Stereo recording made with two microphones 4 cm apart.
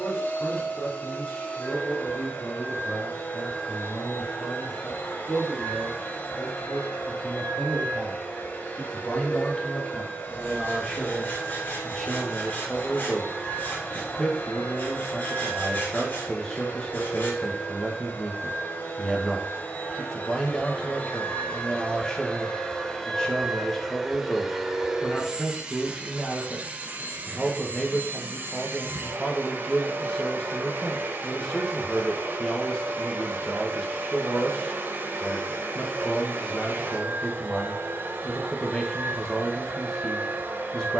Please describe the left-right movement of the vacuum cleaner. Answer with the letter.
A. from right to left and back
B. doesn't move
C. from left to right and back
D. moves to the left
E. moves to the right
E.